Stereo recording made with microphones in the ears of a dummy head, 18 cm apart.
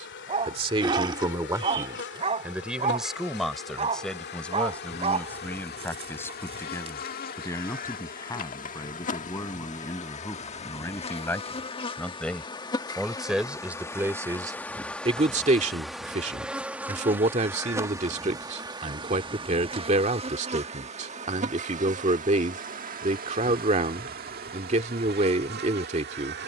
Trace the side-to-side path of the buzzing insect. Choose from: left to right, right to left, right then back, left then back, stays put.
left to right.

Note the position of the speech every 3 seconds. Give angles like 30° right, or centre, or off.
20° right, centre, 10° left, 10° left, 10° right, 30° right, 30° right, 30° right, 30° right.